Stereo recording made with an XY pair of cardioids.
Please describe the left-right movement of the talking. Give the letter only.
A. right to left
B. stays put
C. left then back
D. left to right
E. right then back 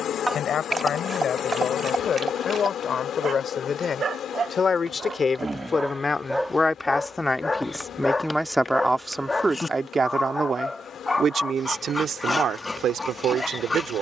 D.